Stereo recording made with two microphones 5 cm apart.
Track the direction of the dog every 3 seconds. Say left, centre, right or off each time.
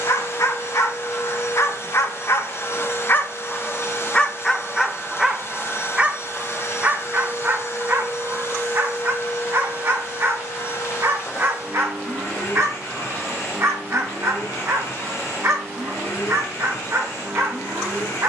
left, centre, right, right, right, right.